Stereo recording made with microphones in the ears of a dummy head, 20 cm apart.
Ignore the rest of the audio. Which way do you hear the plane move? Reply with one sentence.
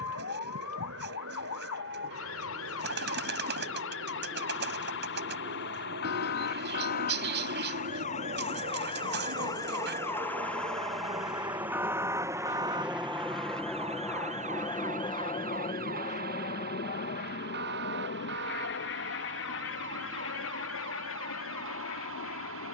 You can hear the plane travel towards the left.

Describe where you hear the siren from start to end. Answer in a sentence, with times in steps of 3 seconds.
In this clip you hear the siren on the left from 0 s, in the centre from 9 s and on the right from 12 s.